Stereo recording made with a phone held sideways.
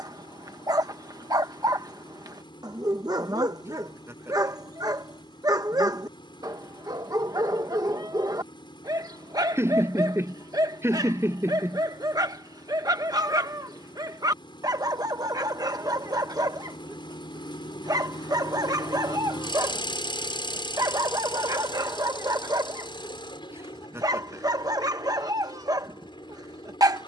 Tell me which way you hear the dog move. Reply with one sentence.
You can hear the dog stay in one place.